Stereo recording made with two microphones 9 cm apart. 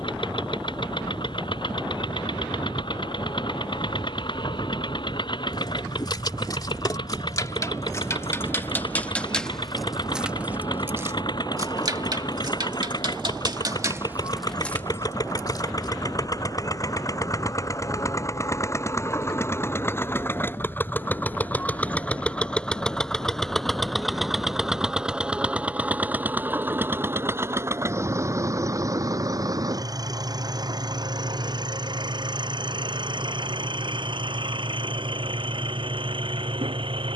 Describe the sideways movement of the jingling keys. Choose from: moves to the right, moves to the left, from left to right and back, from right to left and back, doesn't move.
from left to right and back.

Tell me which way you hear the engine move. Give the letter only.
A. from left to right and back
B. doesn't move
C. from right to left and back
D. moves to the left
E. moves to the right
E.